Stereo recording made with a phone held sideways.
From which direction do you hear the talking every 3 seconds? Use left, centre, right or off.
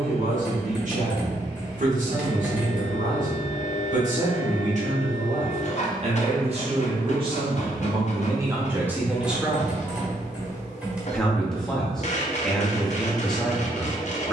right, right, right, centre, centre.